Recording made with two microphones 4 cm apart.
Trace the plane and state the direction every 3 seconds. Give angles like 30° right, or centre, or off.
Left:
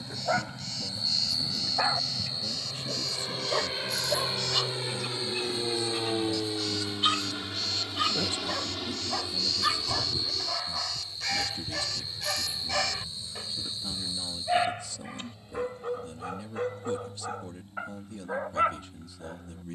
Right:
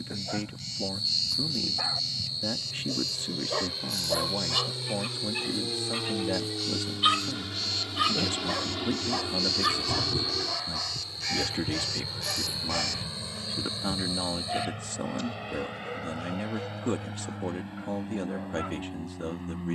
60° left, 40° left, 10° left, 30° right, 50° right, 60° right, 70° right.